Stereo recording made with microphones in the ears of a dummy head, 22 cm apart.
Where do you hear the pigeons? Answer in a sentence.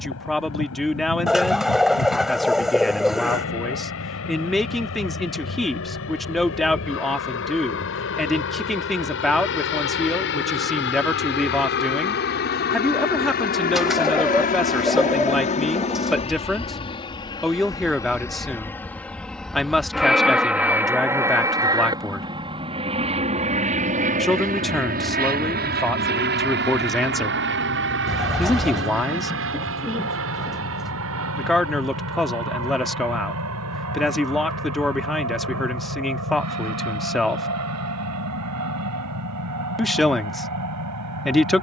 In this clip you hear the pigeons in the centre.